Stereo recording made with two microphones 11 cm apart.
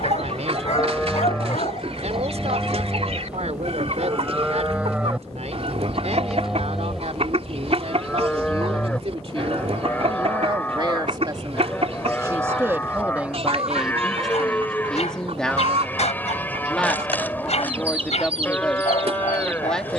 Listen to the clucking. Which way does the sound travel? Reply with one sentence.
You can hear the clucking stay put.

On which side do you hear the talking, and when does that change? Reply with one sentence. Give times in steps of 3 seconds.
You can hear the talking on the right from 0 s and in the centre from 12 s.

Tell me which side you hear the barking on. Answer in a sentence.
In this clip you hear the barking on the left.